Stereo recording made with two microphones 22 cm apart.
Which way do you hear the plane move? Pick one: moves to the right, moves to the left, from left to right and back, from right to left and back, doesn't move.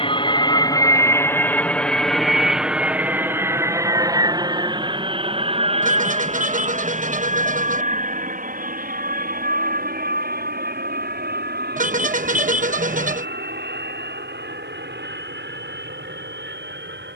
moves to the right.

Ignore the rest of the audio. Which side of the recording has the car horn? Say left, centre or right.
right.